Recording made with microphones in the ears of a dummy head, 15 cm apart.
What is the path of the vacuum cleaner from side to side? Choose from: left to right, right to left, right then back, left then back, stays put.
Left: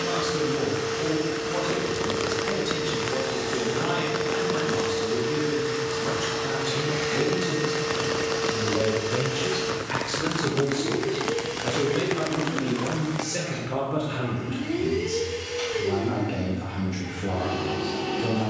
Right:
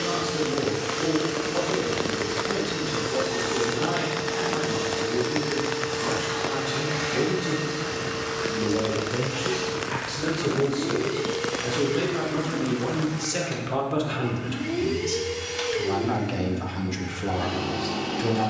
left then back.